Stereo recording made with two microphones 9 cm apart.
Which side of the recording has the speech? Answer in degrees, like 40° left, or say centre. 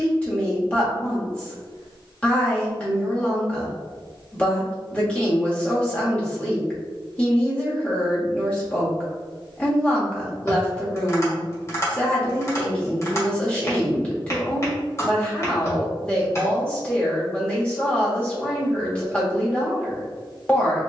10° left.